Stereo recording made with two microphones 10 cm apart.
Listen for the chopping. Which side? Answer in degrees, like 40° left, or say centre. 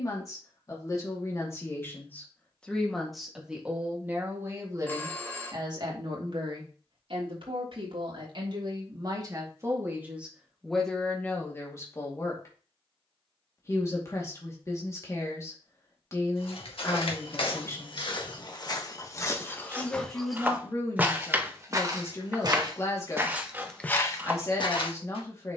20° right.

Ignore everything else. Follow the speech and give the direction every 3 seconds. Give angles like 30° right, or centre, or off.
30° left, 20° right, 50° right, centre, 30° left, 30° left, 30° left, 30° left, 30° left.